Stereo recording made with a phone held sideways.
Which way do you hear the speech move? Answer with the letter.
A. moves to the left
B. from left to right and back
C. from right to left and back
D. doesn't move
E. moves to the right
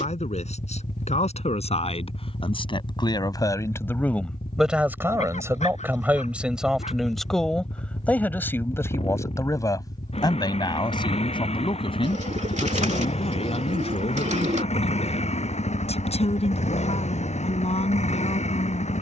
B.